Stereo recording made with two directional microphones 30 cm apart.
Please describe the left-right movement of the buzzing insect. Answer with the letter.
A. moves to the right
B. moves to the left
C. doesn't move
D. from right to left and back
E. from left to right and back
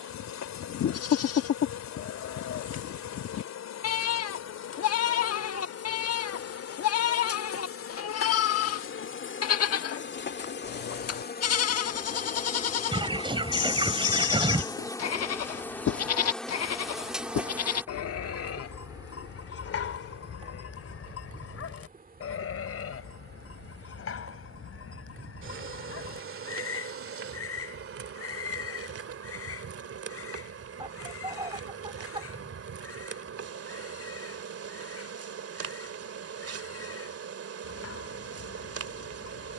A.